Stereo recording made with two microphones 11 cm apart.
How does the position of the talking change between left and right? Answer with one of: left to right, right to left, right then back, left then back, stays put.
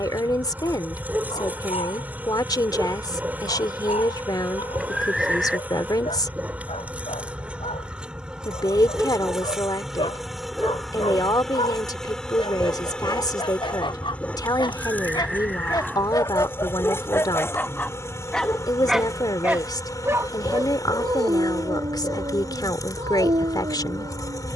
stays put.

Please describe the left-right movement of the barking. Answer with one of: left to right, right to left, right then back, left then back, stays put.
left to right.